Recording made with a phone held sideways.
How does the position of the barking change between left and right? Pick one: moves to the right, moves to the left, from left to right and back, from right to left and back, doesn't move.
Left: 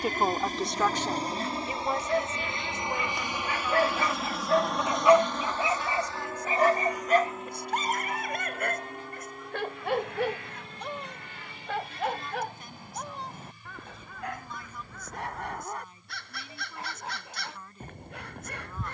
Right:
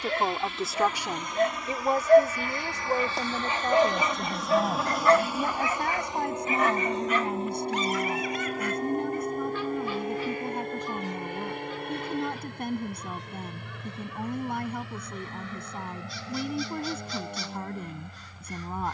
moves to the left.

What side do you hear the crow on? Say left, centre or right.
left.